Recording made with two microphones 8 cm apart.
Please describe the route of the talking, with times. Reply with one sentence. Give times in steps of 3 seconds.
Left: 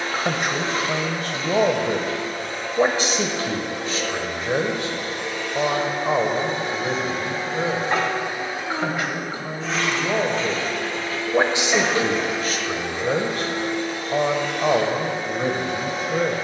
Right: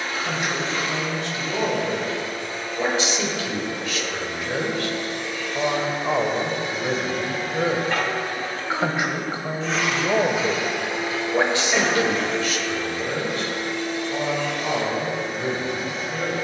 You can hear the talking on the left from 0 s, in the centre from 6 s and on the left from 12 s.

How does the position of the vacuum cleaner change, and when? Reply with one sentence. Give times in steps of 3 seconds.
In this clip you hear the vacuum cleaner on the left from 0 s, in the centre from 9 s and on the left from 12 s.